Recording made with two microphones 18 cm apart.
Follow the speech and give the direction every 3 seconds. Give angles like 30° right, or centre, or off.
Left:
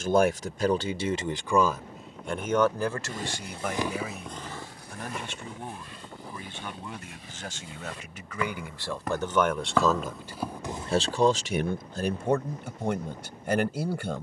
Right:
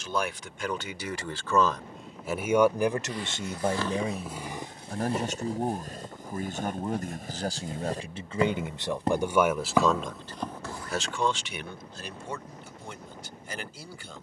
20° left, 40° right, 30° right, 20° left, 60° left.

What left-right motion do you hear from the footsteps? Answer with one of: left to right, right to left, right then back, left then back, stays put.
right then back.